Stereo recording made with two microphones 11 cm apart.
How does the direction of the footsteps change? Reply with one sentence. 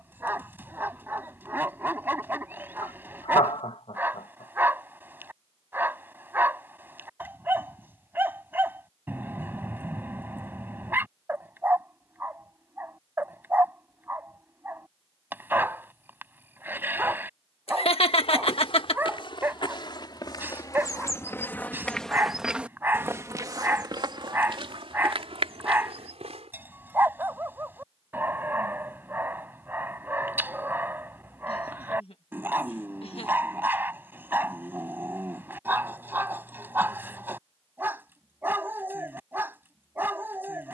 You can hear the footsteps move to the right.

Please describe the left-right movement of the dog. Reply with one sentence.
You can hear the dog stay put.